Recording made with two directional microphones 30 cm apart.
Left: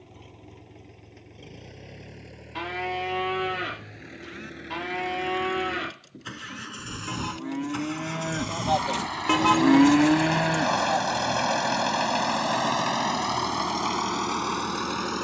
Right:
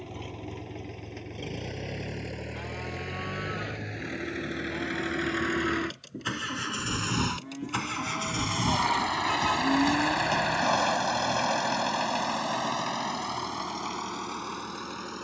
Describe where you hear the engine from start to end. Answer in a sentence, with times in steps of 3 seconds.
In this clip you hear the engine on the right from 0 s, in the centre from 9 s and on the left from 12 s.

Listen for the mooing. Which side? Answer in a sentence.
You can hear the mooing on the left.